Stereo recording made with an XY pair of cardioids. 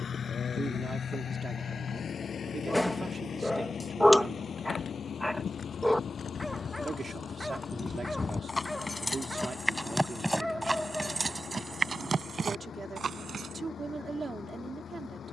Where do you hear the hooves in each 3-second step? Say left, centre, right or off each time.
off, left, left, centre, right.